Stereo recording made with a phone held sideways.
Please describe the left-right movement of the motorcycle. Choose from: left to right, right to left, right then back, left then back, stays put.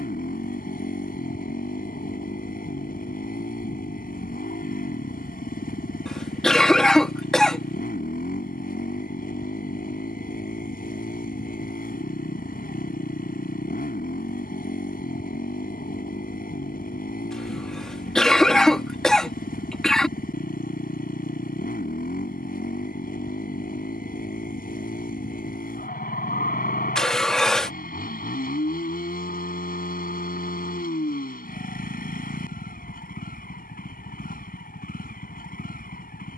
stays put.